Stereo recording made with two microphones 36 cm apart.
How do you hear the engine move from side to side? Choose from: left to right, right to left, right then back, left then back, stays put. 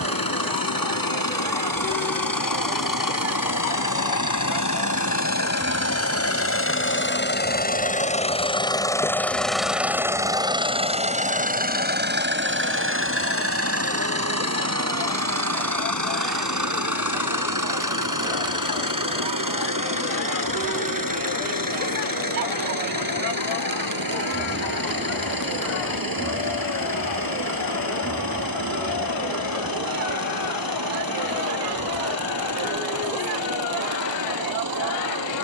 left to right.